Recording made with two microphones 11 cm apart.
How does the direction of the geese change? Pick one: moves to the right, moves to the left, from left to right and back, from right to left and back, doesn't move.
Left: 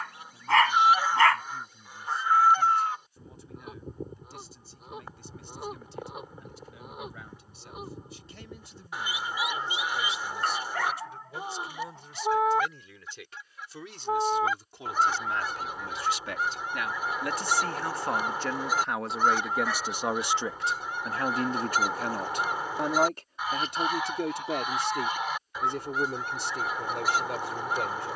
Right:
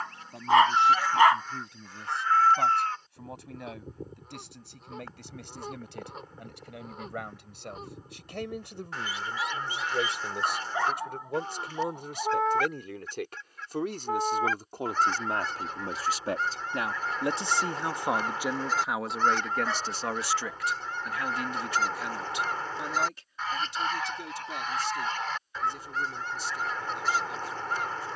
doesn't move.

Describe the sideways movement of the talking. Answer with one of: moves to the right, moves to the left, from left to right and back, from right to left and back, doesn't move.
moves to the left.